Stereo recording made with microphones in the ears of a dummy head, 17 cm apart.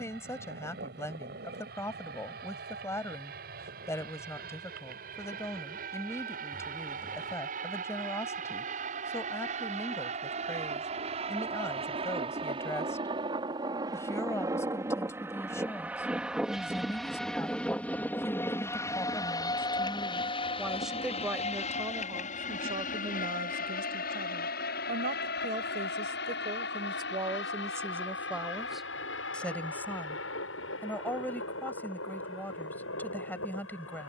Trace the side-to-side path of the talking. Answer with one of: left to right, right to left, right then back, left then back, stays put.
right then back.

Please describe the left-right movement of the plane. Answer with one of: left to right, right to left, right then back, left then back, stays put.
right to left.